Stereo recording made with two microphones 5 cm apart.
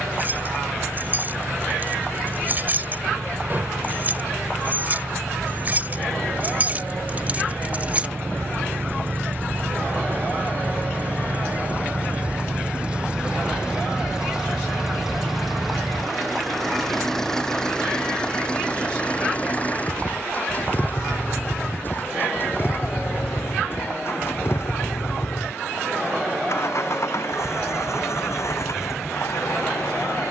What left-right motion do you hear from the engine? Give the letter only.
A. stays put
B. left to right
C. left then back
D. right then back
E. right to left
E.